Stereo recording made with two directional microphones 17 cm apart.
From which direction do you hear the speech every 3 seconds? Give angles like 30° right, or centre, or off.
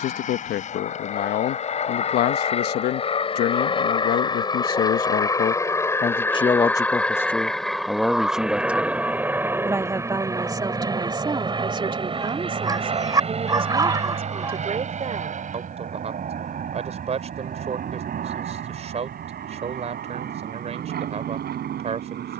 70° left, 60° left, 10° left, 20° right, 30° right, 40° right, 40° right, 40° right.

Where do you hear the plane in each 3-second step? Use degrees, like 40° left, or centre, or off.
40° left, 20° left, centre, 20° right, 30° right, 50° right, 50° right, 60° right.